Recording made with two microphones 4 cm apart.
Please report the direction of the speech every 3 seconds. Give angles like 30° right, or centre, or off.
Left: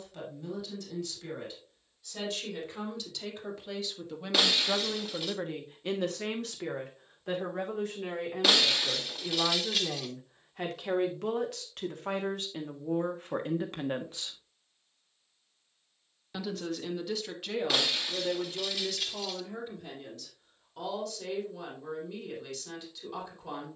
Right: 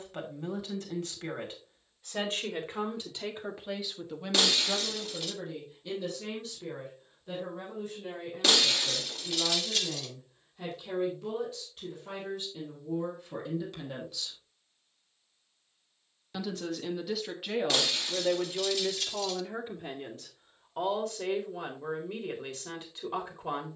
40° right, 10° left, 80° left, 70° left, 50° left, 10° right, 30° right, 40° right.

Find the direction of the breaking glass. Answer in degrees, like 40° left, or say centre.
10° left.